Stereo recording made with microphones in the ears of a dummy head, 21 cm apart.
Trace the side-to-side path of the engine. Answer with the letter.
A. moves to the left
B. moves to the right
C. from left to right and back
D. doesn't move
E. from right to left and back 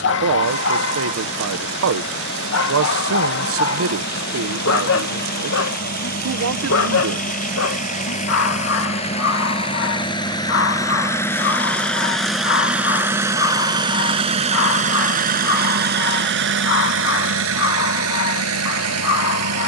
B.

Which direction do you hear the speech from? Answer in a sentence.
In this clip you hear the speech on the right.